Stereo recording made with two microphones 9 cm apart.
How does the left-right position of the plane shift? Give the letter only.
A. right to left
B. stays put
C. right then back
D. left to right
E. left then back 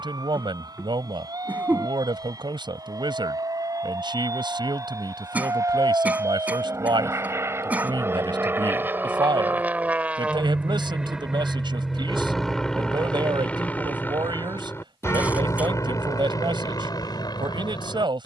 A.